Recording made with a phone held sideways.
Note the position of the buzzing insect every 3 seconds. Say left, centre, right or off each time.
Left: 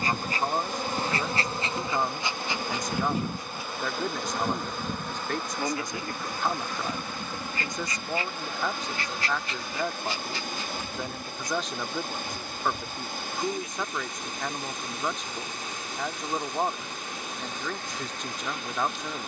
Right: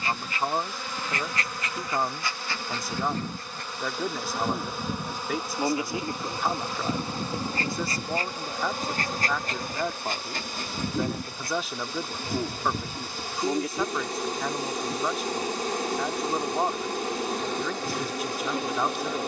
left, centre, right, right, right, right, right.